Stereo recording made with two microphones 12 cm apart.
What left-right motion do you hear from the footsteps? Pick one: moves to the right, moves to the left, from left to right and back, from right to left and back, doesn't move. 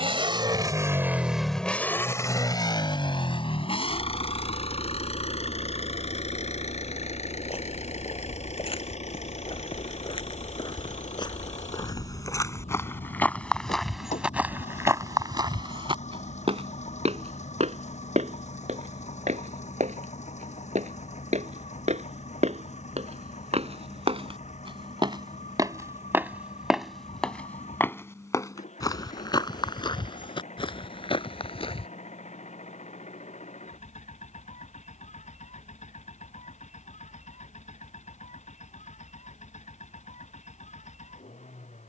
from left to right and back.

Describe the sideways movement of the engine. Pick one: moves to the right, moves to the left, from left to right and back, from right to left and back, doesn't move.
moves to the left.